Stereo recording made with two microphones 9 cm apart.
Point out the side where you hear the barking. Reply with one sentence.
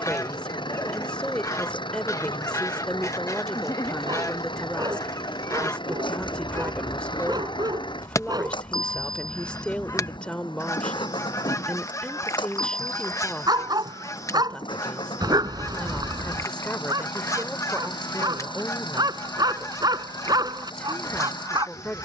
In this clip you hear the barking on the right.